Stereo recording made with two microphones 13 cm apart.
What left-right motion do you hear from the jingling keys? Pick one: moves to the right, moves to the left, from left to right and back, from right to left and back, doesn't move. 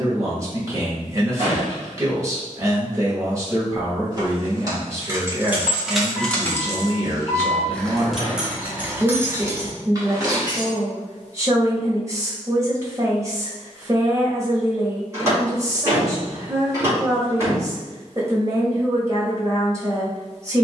from right to left and back.